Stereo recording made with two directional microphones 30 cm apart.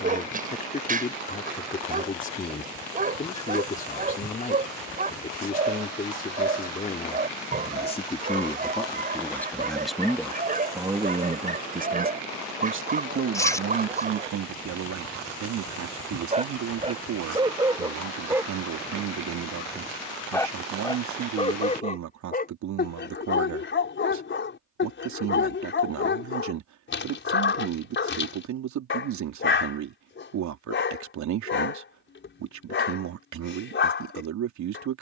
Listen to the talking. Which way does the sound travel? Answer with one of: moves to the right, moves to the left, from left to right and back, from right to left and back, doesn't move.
moves to the right.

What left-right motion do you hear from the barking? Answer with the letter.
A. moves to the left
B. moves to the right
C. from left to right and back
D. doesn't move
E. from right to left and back
A.